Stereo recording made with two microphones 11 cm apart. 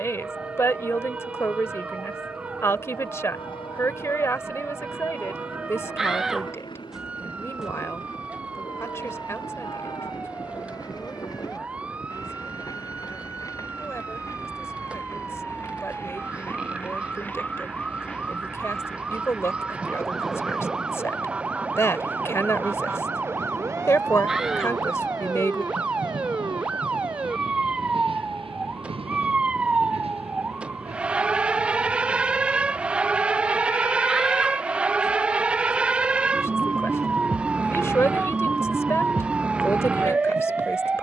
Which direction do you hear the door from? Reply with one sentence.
In this clip you hear the door in the centre.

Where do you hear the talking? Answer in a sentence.
You can hear the talking on the left.